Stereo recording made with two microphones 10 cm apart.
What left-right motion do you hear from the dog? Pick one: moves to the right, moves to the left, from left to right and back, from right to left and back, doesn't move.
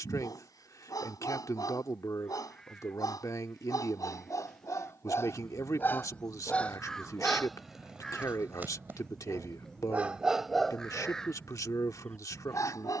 from left to right and back.